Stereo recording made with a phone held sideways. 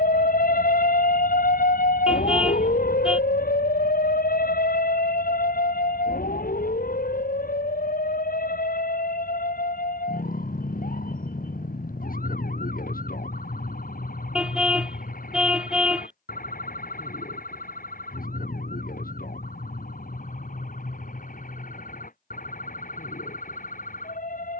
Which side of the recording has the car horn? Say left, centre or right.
centre.